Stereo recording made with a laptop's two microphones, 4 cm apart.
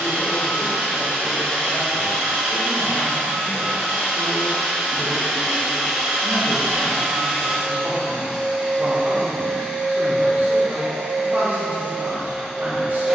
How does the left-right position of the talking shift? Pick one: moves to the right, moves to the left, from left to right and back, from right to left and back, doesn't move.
moves to the right.